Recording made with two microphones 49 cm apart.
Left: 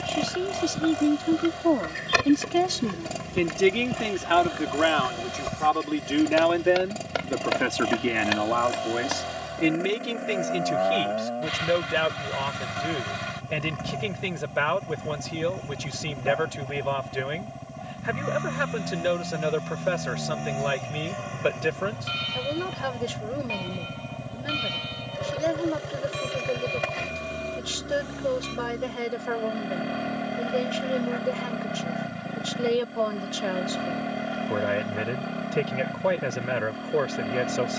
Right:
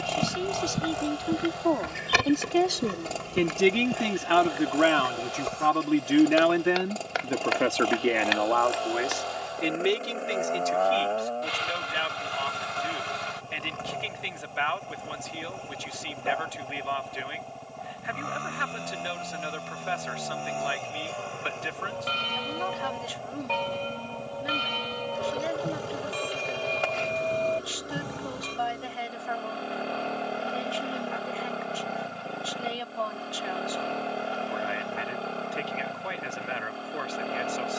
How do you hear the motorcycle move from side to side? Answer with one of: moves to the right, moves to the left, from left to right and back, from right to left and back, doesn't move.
doesn't move.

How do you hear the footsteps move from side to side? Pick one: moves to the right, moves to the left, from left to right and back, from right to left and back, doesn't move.
moves to the left.